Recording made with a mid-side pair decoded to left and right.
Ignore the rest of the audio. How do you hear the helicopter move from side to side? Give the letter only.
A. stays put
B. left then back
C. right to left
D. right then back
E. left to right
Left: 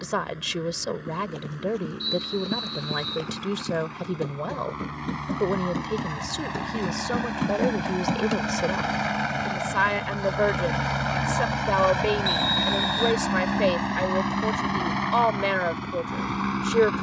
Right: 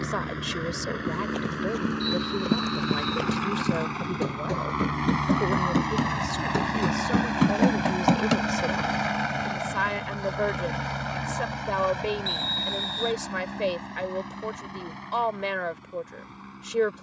C.